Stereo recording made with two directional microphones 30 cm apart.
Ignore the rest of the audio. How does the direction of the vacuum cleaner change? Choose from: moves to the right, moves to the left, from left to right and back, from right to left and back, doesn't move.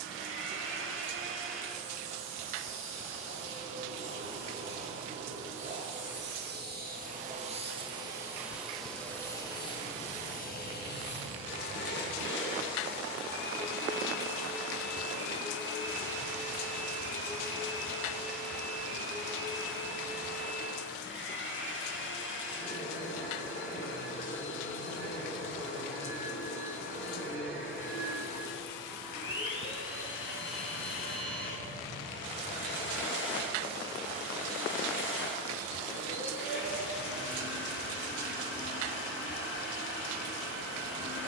moves to the left.